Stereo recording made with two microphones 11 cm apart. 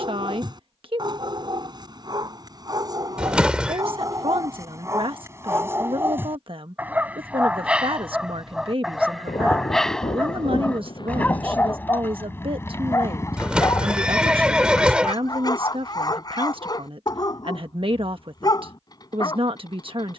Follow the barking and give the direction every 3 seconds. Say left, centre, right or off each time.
right, right, centre, centre, left, left, left.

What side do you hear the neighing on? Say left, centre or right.
centre.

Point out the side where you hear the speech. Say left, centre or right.
right.